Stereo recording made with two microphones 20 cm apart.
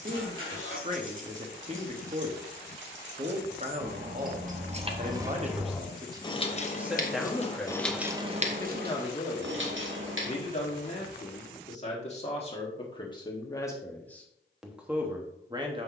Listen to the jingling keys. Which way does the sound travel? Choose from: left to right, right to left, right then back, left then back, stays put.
left then back.